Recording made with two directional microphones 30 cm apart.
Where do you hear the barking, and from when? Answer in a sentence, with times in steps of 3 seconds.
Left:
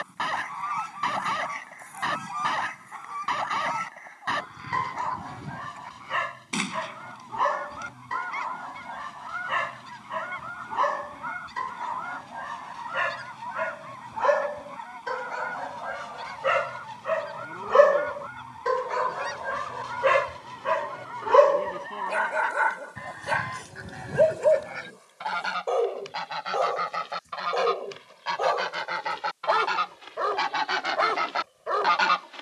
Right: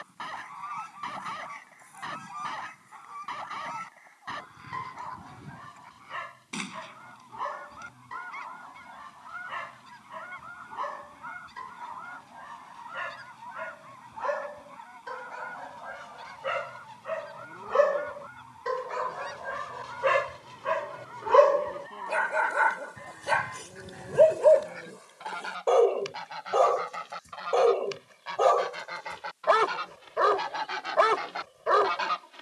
You can hear the barking on the left from 0 s, in the centre from 21 s and on the right from 24 s.